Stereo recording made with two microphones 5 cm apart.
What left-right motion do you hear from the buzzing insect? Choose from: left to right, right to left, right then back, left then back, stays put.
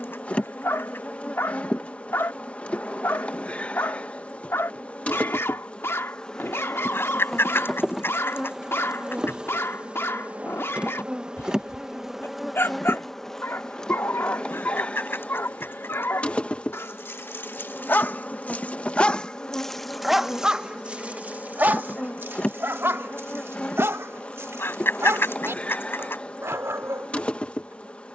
right then back.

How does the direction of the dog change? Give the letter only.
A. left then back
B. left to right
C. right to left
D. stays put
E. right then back
B.